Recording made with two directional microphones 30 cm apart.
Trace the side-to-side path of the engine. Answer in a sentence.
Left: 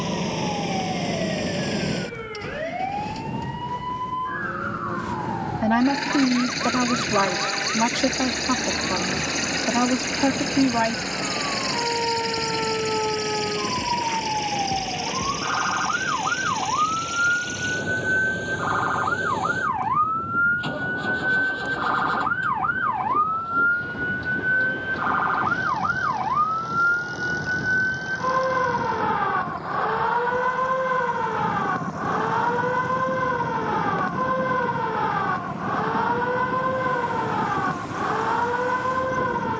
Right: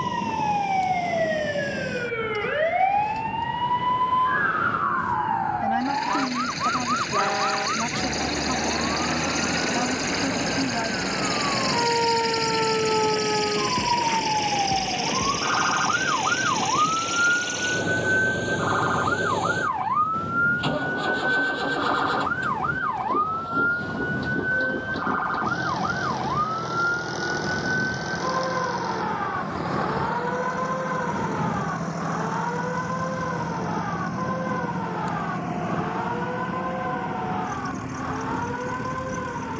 In this clip you hear the engine move to the right.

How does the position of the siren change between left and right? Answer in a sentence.
You can hear the siren go from the right side to the left.